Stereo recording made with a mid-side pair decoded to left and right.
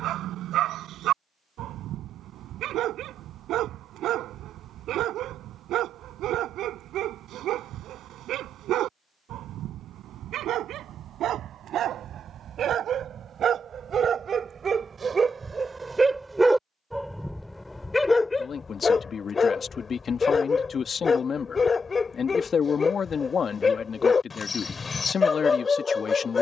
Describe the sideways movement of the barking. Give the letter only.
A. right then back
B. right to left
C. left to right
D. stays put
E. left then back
B.